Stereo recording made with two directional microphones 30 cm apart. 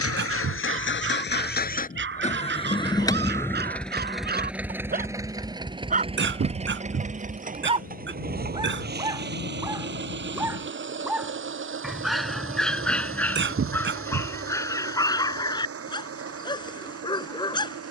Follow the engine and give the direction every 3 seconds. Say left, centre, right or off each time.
left, centre, right, right, right, right.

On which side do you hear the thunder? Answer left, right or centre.
left.